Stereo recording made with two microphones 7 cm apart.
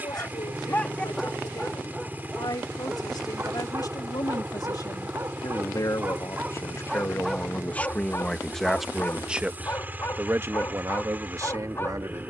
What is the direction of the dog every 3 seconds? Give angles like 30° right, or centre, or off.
centre, 40° right, 10° left, 30° left.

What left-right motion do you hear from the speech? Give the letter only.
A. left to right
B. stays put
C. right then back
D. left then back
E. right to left
A.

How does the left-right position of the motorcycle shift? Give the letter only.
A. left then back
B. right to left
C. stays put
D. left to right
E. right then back
C.